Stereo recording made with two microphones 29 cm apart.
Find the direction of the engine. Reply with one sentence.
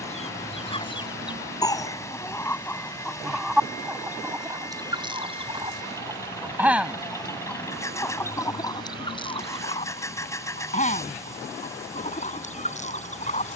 You can hear the engine in the centre.